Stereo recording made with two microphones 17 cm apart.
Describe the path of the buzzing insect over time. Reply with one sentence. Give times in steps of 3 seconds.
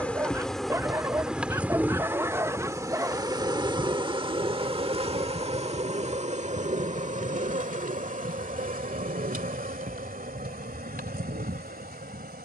In this clip you hear the buzzing insect in the centre from 0 s and on the right from 3 s.